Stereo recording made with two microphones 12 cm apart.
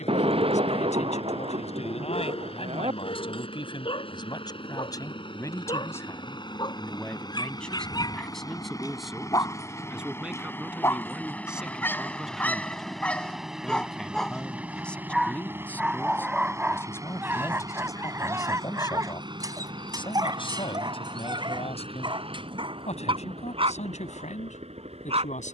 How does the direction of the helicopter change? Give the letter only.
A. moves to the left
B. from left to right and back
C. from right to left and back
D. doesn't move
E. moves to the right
E.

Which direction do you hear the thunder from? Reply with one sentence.
In this clip you hear the thunder on the right.